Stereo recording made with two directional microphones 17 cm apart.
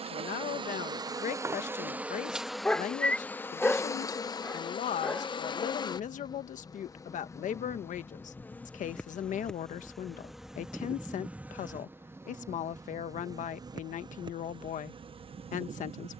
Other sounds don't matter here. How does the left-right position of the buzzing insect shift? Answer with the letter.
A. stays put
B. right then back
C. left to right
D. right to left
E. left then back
E.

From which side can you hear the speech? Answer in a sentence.
You can hear the speech on the left.